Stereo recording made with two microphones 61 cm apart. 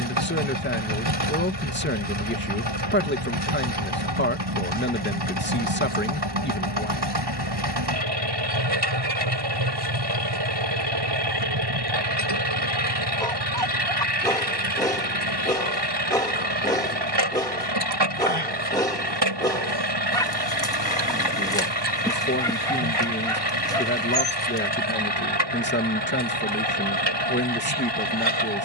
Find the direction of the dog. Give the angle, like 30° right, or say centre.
10° left.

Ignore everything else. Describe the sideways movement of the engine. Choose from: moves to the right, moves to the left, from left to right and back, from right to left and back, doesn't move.
doesn't move.